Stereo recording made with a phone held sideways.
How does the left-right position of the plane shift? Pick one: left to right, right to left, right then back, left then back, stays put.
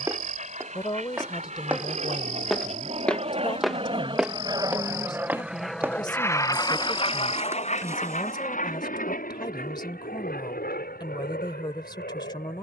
right to left.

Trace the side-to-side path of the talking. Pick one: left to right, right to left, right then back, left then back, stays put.
stays put.